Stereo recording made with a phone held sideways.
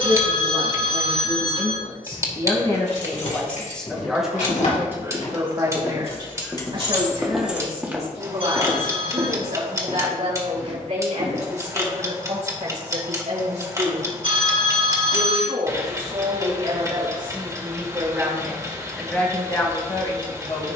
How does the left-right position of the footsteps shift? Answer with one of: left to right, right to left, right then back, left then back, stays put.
left to right.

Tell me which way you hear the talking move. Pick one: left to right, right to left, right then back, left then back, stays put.
right then back.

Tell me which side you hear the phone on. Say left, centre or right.
right.